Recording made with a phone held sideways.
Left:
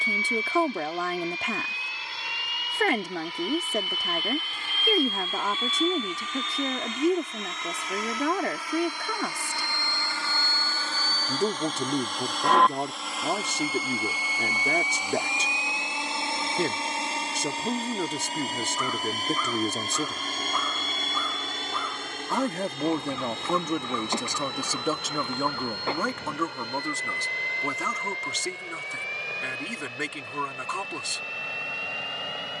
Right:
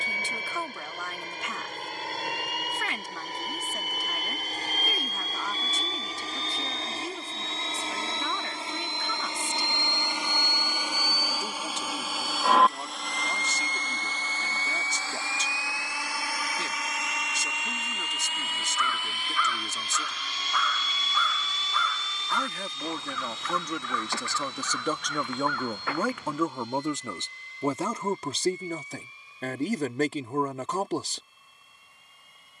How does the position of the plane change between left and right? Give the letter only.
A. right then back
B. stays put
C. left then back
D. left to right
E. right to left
E.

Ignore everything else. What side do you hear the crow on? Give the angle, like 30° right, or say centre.
30° left.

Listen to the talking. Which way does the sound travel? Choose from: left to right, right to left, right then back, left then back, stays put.
left to right.